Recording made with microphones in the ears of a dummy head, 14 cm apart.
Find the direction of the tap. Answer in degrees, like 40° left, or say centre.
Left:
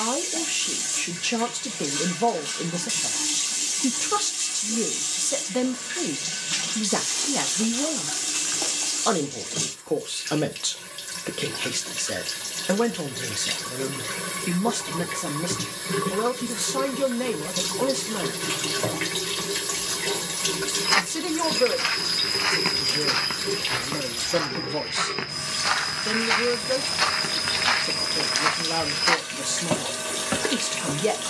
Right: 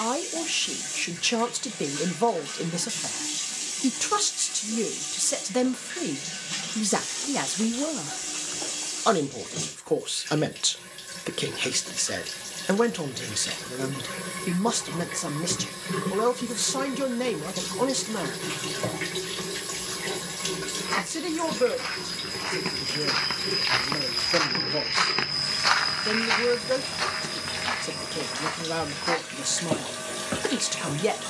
20° left.